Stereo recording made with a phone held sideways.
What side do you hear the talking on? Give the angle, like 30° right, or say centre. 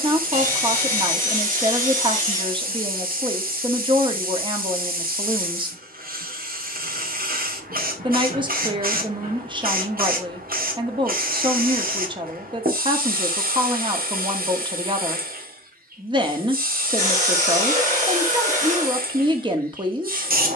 30° right.